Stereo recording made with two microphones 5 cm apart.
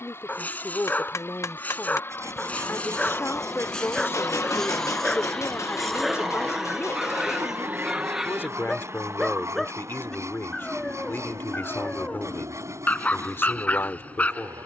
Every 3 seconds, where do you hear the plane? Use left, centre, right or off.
left, left, right, right, right.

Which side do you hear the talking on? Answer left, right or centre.
left.